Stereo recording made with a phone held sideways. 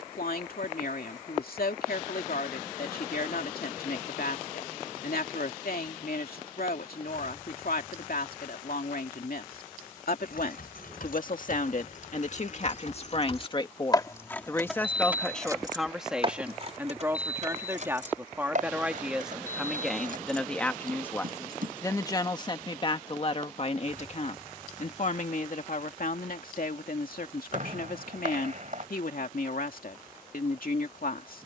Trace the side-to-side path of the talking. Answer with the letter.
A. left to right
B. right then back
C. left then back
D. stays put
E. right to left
B.